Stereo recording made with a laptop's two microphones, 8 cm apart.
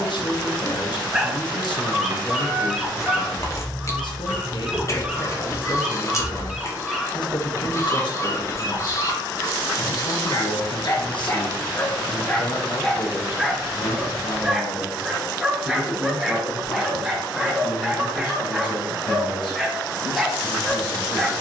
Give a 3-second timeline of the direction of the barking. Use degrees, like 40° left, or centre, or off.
10° right, 10° right, 20° left, 40° left, centre, 10° right, 10° right.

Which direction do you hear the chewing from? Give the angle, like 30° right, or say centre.
40° left.